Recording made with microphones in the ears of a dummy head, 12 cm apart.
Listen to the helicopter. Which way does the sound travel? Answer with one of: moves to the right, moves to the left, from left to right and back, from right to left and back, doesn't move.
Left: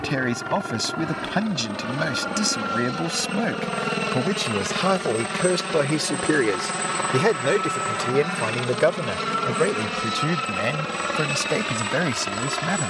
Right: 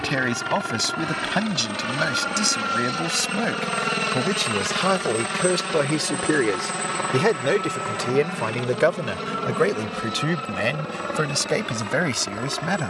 moves to the left.